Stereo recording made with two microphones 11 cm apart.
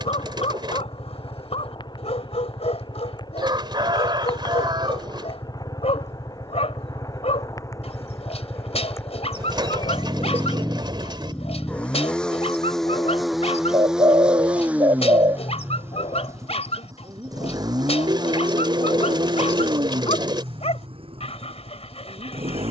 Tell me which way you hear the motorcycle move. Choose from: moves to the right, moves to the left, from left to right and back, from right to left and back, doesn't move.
moves to the right.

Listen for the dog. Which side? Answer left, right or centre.
left.